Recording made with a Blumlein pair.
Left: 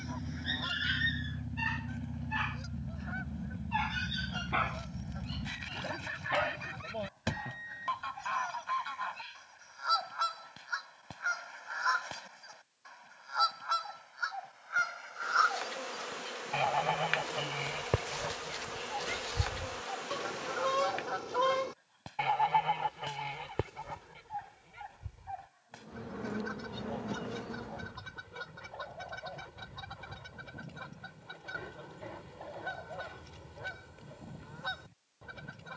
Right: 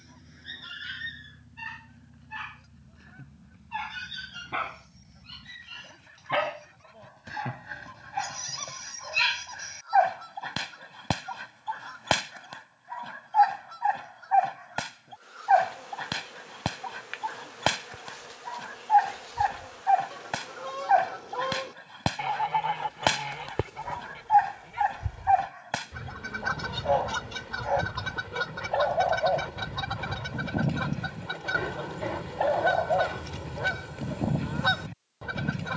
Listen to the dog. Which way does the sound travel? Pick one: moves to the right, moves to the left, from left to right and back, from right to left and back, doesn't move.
moves to the right.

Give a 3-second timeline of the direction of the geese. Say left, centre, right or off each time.
left, left, left, left, left, left, left, centre, right, right, right, right.